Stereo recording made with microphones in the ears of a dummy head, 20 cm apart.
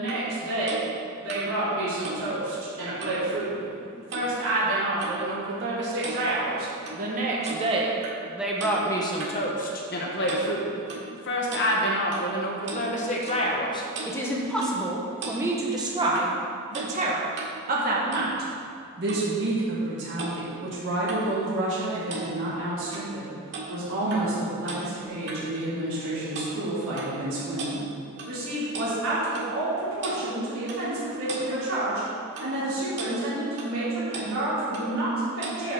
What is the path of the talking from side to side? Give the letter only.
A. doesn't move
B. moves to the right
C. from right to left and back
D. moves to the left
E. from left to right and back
C.